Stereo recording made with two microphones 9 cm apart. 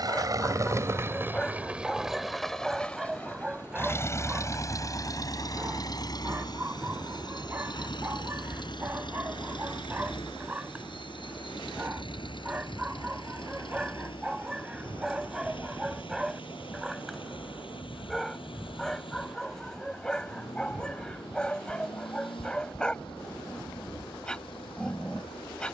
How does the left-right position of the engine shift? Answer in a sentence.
You can hear the engine go from the right side to the left.